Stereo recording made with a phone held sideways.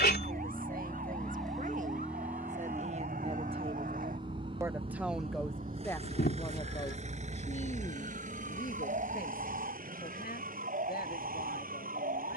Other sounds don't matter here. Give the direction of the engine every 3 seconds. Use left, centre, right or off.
centre, right, right, right.